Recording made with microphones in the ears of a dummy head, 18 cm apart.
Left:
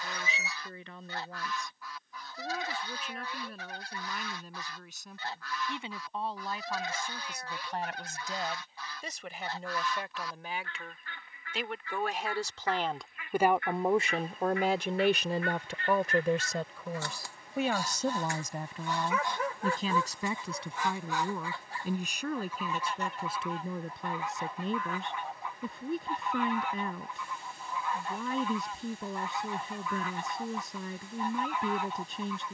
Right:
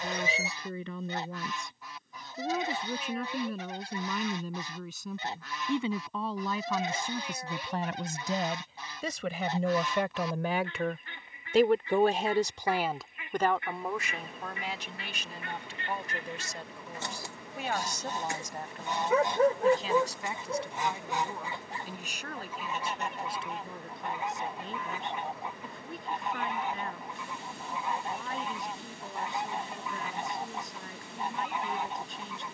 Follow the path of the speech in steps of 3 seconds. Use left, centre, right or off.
right, right, right, right, centre, left, left, left, left, left, left.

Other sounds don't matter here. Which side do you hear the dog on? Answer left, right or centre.
right.